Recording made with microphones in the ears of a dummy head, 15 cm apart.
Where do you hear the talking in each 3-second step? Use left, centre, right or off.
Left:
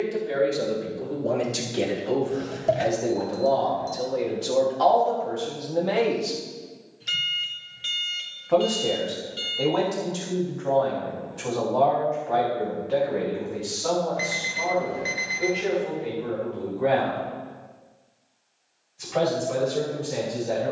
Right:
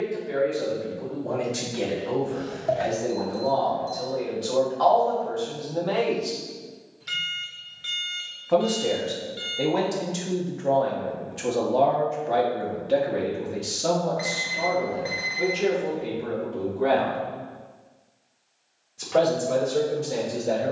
left, left, centre, right, right, right, right.